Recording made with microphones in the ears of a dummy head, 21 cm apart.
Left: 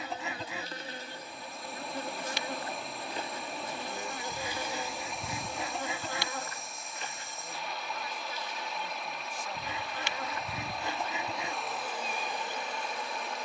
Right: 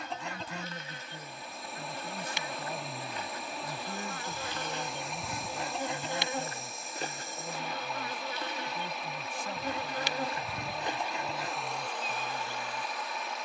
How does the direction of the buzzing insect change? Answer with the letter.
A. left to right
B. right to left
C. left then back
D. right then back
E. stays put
D.